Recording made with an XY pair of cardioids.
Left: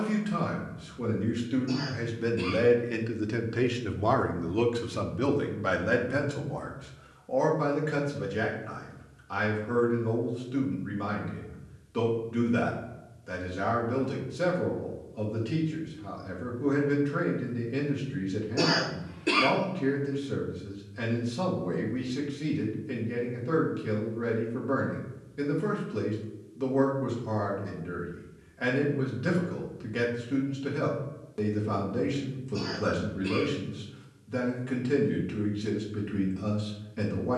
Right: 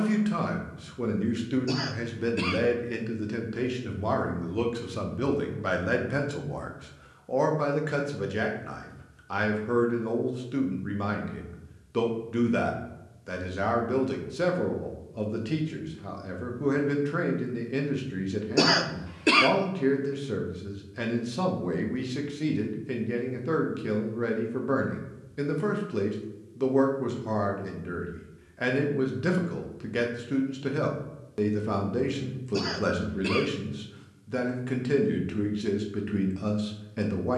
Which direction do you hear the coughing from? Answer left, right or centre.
right.